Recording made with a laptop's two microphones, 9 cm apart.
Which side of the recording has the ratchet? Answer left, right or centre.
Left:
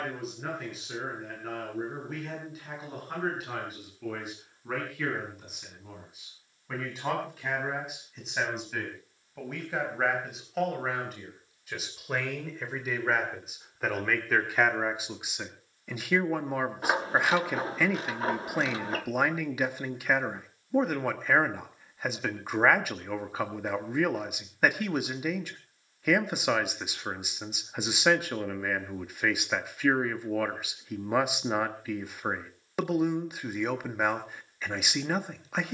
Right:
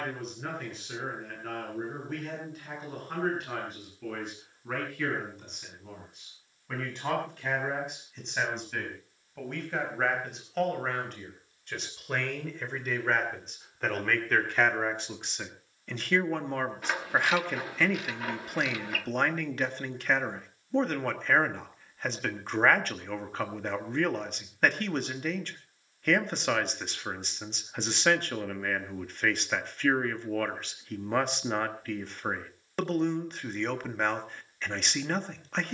left.